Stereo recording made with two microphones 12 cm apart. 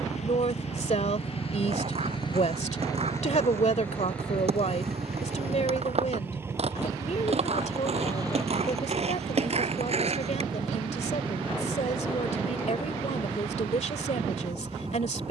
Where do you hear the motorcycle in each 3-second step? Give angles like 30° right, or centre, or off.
50° left, 10° left, 30° right, 40° right, 50° right.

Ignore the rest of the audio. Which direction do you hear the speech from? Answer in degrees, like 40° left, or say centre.
70° left.